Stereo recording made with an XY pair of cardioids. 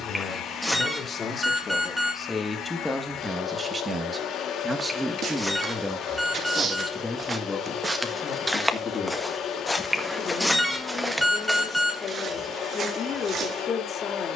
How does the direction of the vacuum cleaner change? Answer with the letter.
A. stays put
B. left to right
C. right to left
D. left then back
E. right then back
A.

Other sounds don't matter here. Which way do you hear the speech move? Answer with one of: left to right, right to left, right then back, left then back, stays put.
right then back.